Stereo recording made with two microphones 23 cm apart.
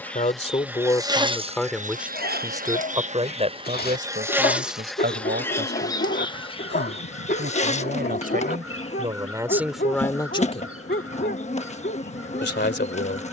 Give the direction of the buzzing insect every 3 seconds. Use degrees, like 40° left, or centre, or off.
20° right, 10° right, 30° left, 30° left, 30° left.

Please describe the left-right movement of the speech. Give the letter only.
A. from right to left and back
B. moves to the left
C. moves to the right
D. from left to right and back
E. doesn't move
D.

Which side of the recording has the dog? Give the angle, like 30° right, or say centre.
40° left.